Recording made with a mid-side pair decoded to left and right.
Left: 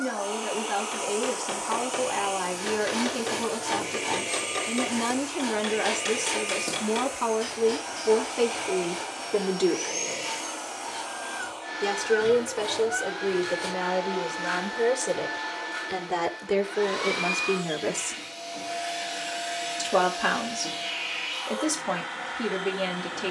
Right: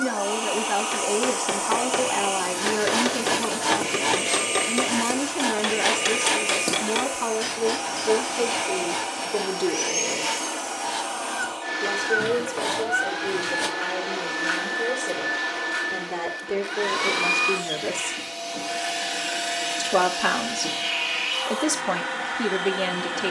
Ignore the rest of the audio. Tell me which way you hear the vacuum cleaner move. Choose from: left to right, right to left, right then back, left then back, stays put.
stays put.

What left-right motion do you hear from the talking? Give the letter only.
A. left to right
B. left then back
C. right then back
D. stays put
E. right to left
B.